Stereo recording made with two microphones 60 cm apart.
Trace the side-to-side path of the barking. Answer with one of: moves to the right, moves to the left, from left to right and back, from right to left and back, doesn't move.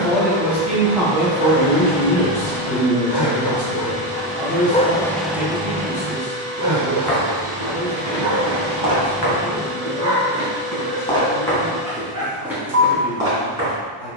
moves to the right.